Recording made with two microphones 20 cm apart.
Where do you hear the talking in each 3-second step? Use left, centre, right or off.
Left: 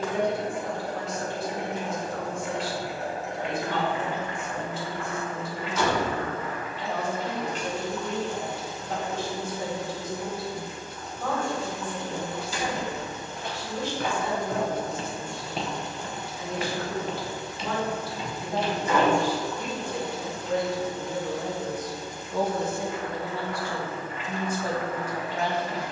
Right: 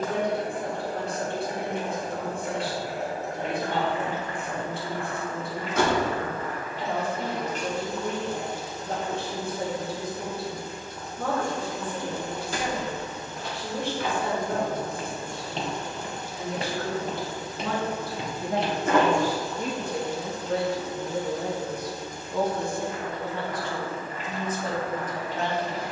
right, right, right, right, right, right, right, centre, centre.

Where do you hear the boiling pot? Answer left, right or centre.
right.